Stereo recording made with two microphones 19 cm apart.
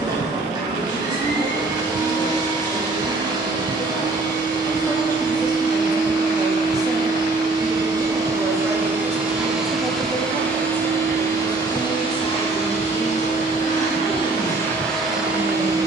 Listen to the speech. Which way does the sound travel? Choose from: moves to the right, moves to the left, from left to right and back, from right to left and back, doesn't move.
from left to right and back.